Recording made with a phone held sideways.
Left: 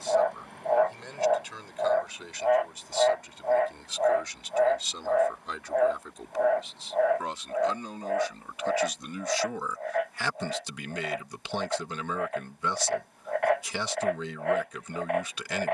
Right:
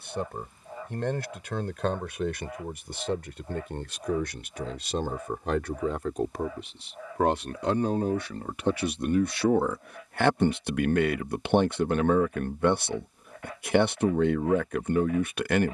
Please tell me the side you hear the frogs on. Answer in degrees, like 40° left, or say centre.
70° left.